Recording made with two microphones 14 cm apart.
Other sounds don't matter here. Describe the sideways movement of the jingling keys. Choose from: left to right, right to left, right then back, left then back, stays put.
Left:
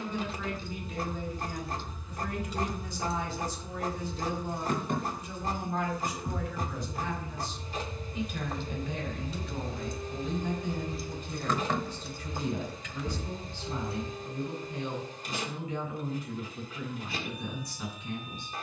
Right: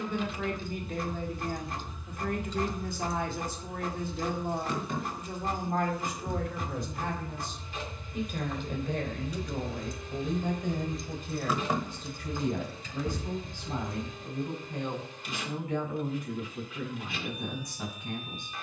left then back.